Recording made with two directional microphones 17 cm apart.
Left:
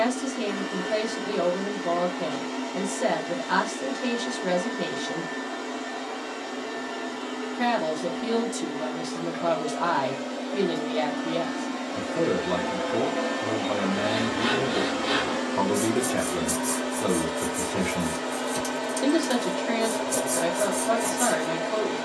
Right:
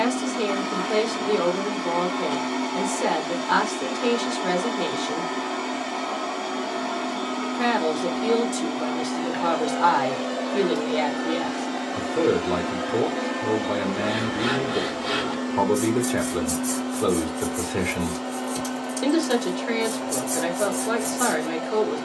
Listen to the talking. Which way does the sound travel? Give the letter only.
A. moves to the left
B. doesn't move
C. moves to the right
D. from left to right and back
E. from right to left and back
B.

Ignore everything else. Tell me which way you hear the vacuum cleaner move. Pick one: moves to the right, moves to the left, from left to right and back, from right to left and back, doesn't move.
moves to the left.